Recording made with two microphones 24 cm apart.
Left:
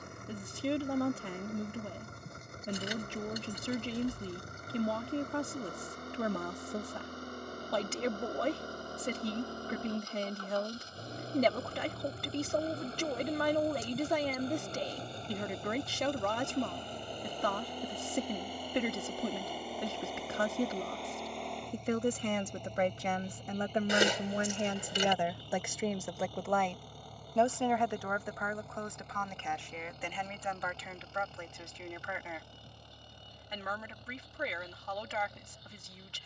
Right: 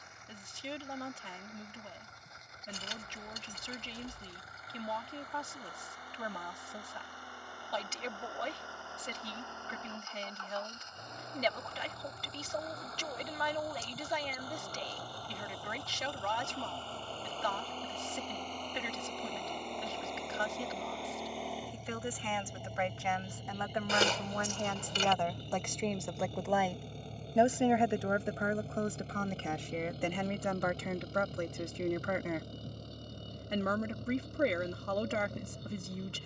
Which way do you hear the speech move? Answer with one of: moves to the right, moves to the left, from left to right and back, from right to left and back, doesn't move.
moves to the right.